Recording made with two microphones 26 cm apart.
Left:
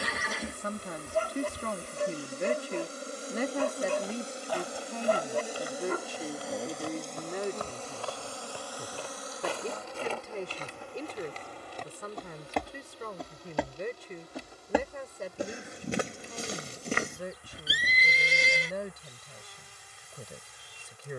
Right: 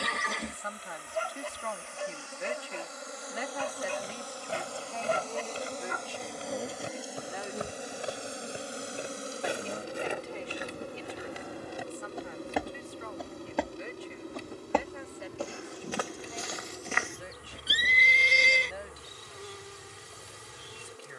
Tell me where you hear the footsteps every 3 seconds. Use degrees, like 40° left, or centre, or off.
off, 20° right, 20° right, 10° right, centre, 30° left, off.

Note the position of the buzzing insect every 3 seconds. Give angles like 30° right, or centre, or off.
40° left, 20° left, 10° right, 40° right, 60° right, 70° right, 70° right.